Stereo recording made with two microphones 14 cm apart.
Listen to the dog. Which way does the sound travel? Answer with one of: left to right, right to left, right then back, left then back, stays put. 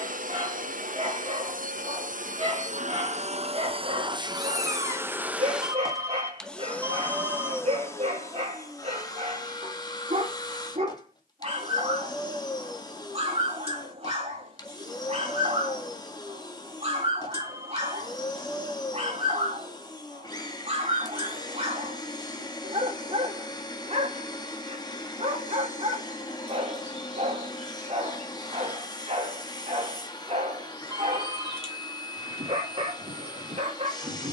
stays put.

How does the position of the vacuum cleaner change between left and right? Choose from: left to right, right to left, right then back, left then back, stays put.
right to left.